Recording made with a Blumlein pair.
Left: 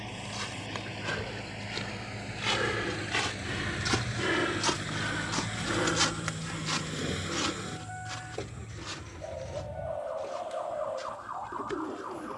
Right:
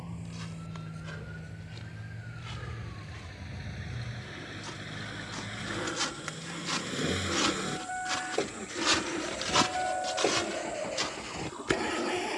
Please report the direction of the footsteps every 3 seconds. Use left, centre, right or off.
left, left, centre, right.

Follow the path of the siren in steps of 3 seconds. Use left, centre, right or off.
right, centre, left, left.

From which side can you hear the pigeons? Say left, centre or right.
centre.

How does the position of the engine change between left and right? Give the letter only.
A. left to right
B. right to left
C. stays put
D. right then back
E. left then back
A.